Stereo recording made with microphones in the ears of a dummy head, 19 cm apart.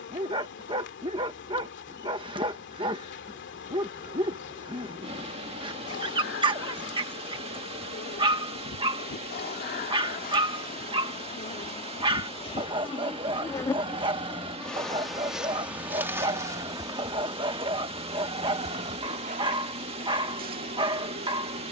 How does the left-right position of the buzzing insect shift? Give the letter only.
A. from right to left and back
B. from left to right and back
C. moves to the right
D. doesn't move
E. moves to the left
C.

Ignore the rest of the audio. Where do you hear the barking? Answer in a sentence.
In this clip you hear the barking on the right.